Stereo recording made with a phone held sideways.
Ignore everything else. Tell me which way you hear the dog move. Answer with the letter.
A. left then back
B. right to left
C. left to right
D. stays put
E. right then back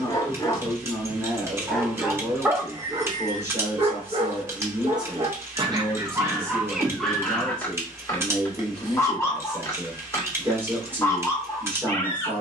E.